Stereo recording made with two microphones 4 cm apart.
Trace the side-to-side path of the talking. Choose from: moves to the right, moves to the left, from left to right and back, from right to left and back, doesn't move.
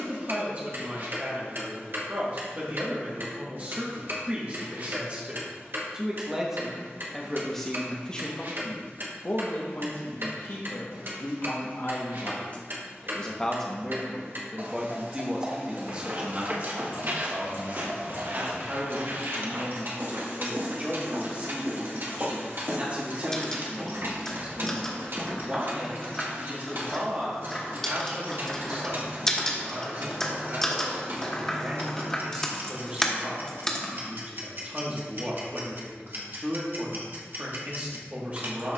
from right to left and back.